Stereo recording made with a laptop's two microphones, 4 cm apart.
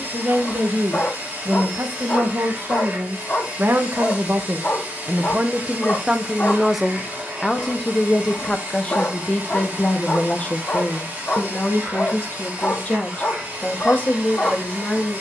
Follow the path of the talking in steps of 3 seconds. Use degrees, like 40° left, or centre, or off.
60° right, 40° right, centre, 30° left, 40° left.